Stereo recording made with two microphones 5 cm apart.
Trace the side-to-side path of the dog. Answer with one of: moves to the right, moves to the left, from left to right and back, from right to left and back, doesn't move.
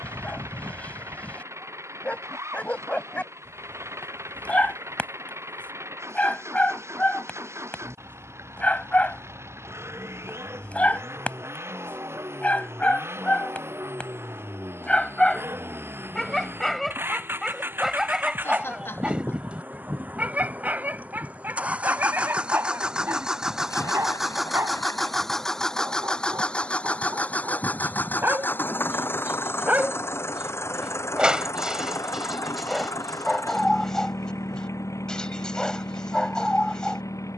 from left to right and back.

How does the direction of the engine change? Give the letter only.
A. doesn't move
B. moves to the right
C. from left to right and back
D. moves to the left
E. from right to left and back
D.